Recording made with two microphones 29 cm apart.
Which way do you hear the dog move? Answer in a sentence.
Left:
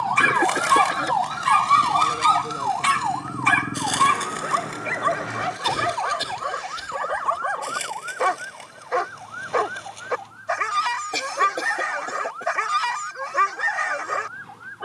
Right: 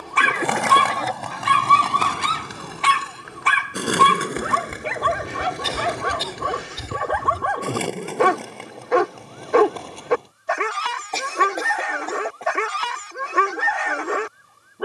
You can hear the dog stay in one place.